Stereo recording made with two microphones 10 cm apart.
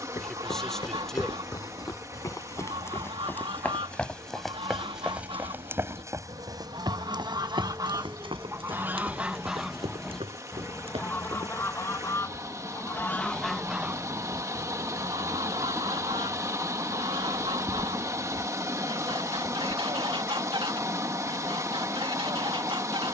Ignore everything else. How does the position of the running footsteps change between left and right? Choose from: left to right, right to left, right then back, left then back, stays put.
left to right.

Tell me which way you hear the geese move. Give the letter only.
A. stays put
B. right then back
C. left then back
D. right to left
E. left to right
C.